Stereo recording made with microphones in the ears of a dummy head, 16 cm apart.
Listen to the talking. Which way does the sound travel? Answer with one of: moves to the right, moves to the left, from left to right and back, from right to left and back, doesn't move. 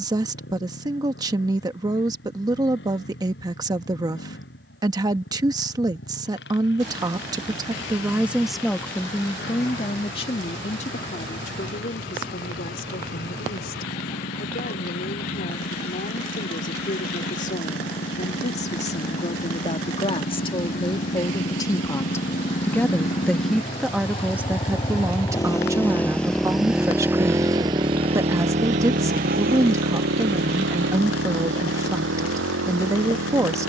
from right to left and back.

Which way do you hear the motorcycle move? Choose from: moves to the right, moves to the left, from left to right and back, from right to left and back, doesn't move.
moves to the right.